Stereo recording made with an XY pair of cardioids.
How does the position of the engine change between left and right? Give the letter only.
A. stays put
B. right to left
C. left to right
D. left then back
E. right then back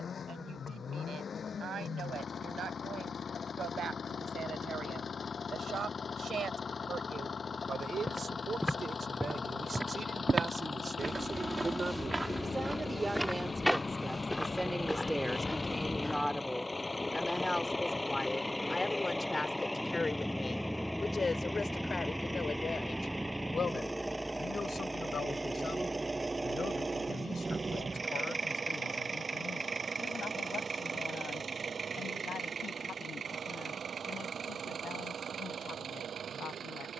C.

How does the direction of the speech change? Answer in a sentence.
You can hear the speech move to the left.